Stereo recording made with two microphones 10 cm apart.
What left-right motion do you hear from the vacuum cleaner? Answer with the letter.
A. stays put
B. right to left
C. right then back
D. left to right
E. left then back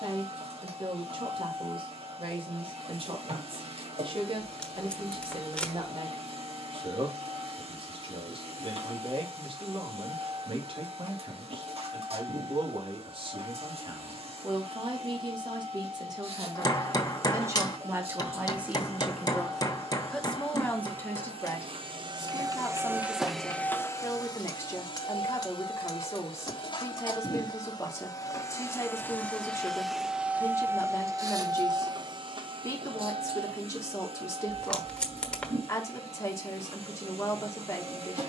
E.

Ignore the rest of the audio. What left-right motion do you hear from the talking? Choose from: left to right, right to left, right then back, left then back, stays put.
right to left.